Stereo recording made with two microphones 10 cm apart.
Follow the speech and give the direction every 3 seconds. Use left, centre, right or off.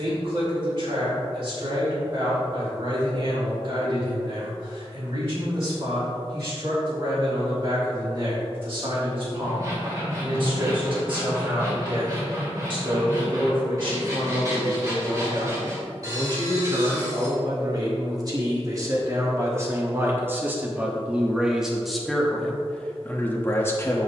right, right, right, right, right, right, right, centre.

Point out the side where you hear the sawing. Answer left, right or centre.
right.